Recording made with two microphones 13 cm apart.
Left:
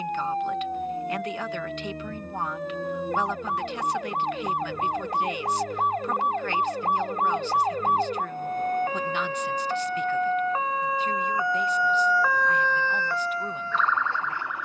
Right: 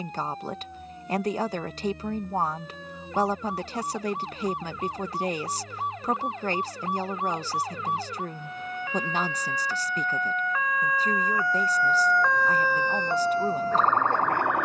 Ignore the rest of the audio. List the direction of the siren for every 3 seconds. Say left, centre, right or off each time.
left, left, left, left, right.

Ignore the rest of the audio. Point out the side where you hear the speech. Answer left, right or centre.
right.